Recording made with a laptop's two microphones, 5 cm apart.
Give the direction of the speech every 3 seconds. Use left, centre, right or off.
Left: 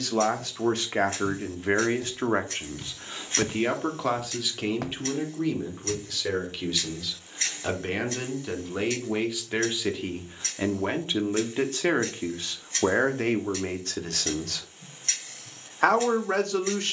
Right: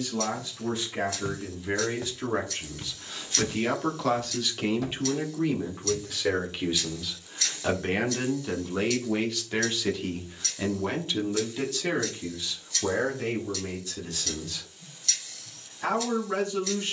left, centre, centre, left, left, left.